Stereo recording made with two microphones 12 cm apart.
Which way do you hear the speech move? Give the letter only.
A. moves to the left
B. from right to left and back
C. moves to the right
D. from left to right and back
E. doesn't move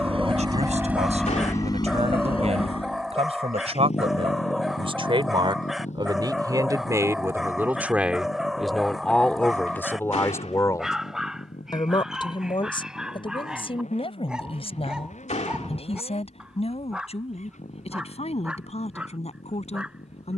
A.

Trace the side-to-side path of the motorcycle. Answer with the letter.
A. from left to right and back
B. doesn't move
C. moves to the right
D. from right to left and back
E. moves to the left
E.